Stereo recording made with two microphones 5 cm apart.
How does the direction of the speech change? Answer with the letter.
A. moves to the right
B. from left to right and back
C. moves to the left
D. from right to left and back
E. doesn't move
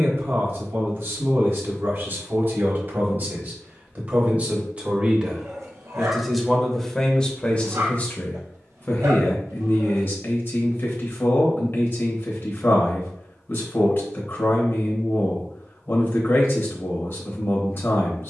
C.